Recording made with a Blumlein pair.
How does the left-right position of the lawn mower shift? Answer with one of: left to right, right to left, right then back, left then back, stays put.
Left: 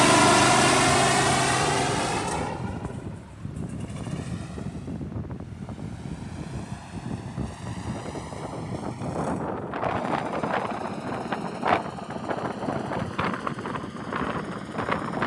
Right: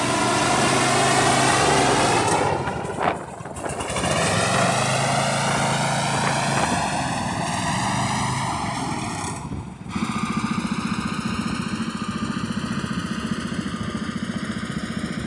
left to right.